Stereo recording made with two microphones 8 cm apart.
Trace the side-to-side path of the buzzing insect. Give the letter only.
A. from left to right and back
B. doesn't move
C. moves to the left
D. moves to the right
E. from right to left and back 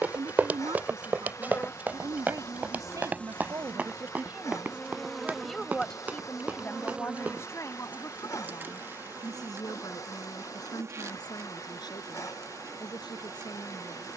D.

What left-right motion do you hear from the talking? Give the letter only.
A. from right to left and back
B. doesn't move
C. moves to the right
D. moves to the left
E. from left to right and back
D.